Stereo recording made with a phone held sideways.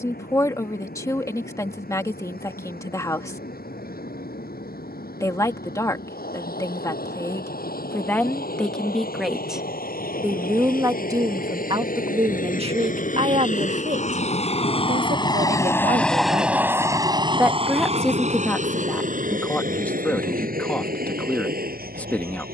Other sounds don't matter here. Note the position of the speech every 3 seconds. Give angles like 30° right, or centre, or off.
20° left, 20° left, 10° left, 20° right, 50° right, 40° right, 10° left, 10° left.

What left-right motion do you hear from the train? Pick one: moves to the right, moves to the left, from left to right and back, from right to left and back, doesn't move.
moves to the right.